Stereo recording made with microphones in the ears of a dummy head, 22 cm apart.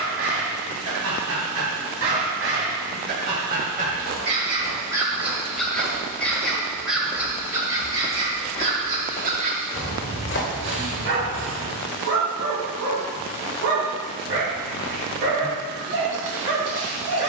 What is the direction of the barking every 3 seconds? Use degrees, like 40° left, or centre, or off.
60° right, 20° right, 10° right, 50° right, 60° right, 60° right.